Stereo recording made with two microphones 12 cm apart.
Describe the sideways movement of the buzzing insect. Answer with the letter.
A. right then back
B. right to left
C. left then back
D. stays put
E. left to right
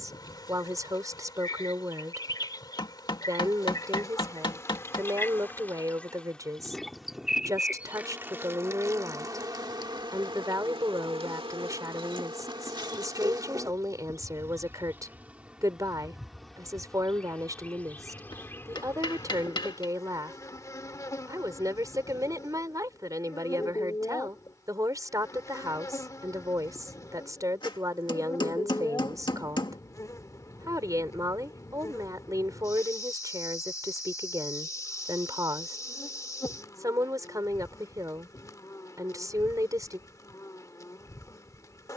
A.